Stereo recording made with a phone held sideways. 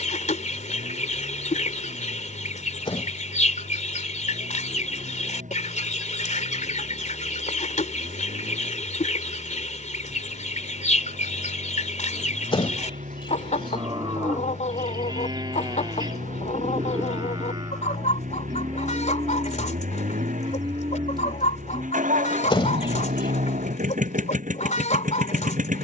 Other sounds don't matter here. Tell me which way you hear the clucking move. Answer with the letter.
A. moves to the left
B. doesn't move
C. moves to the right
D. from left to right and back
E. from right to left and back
B.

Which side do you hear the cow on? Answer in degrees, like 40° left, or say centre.
30° right.